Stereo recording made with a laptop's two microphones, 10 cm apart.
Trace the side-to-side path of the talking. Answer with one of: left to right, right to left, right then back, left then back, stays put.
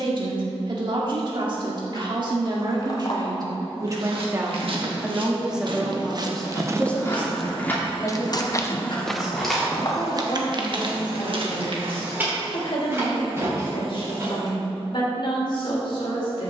right to left.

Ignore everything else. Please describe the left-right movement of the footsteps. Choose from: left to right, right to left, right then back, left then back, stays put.
left then back.